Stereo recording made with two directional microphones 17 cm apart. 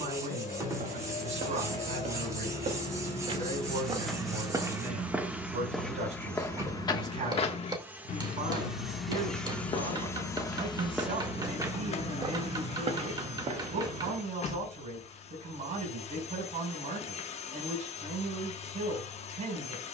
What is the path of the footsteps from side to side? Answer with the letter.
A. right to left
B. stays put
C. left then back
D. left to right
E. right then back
C.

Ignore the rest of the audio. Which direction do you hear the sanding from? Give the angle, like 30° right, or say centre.
20° right.